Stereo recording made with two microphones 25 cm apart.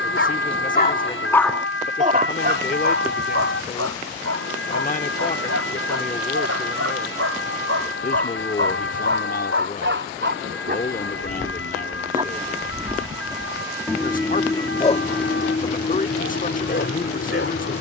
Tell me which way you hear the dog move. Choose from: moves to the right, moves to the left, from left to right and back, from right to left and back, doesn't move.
from left to right and back.